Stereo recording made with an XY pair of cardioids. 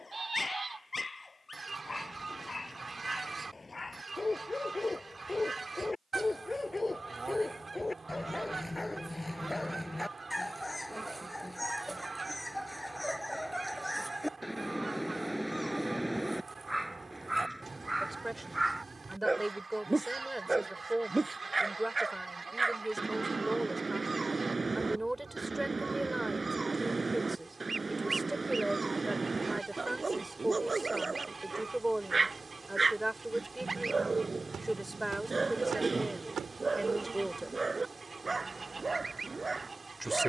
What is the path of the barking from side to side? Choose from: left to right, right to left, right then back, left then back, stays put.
left to right.